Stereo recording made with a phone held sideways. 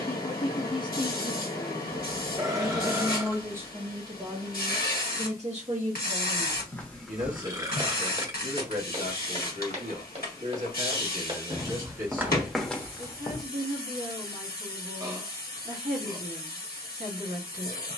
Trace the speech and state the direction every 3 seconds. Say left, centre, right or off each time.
left, right, right, right, right, right.